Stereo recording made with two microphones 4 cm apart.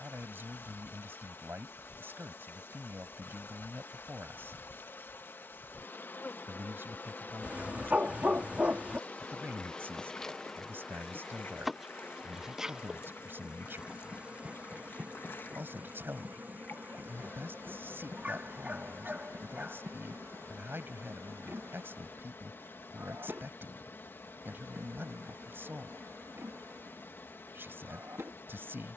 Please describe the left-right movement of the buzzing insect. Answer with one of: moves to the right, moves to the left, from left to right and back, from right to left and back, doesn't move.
moves to the right.